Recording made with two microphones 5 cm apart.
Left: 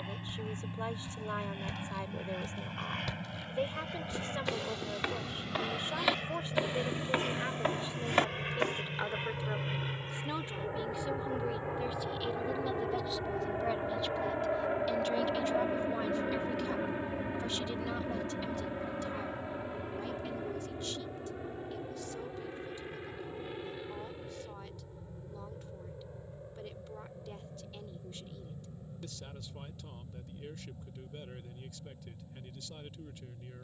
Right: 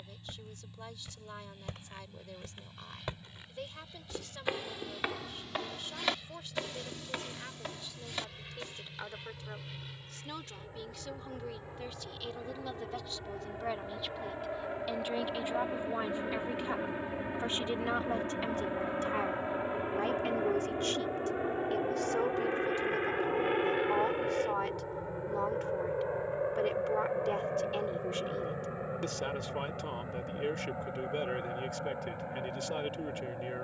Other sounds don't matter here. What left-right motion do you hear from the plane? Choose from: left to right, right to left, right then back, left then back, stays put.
left to right.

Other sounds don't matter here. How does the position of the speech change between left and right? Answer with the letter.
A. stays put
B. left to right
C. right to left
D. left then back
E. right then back
B.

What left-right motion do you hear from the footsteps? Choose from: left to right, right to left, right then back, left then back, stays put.
right to left.